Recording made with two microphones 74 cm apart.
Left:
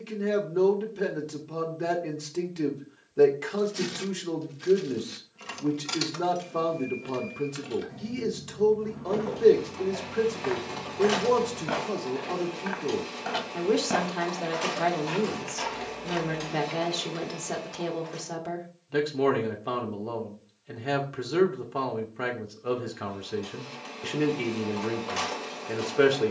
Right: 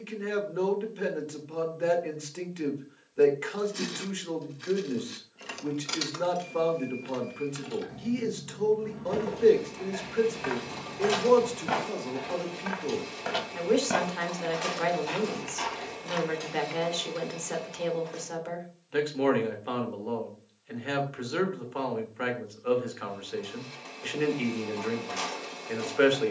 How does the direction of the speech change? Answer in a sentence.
In this clip you hear the speech stay put.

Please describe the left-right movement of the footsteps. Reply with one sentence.
In this clip you hear the footsteps travel towards the left.